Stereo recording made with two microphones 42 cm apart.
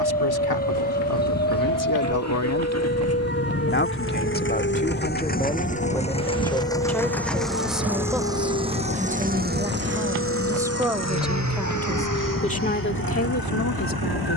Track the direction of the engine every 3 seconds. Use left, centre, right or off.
left, left, centre, right, right.